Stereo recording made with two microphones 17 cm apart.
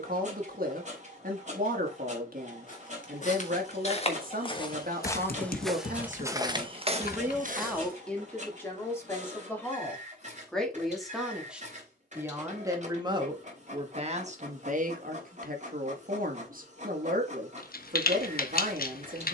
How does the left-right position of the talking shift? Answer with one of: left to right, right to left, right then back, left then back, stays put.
left then back.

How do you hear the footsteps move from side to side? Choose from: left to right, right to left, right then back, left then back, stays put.
left to right.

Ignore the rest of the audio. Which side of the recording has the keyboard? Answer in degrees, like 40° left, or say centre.
60° left.